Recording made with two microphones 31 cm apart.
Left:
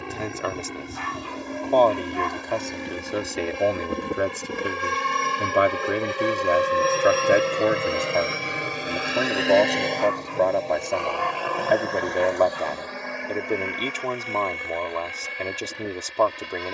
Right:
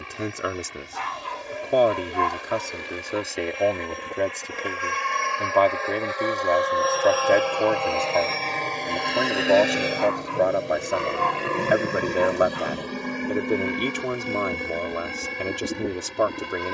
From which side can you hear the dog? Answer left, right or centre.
right.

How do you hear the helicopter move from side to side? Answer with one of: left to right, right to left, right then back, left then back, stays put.
left to right.